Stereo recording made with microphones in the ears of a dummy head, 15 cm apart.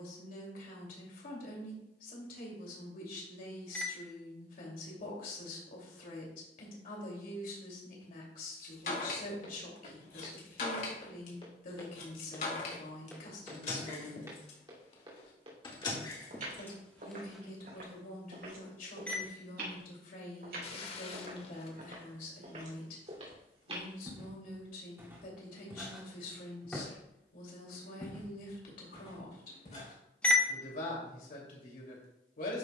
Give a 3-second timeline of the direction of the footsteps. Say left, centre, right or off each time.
off, off, off, left, centre, right, right, right, centre, left, off.